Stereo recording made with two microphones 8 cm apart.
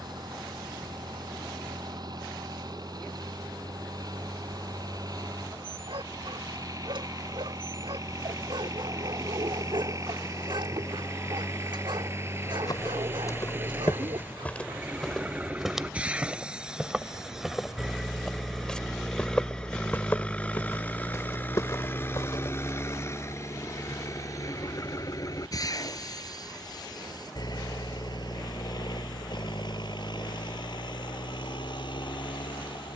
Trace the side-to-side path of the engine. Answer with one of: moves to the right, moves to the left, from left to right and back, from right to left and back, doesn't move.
moves to the left.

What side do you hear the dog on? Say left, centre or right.
right.